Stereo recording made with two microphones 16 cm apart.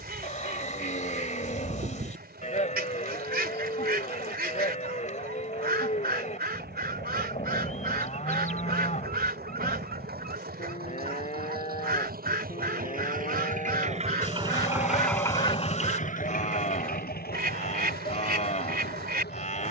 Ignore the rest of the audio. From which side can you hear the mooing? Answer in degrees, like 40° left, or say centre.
50° left.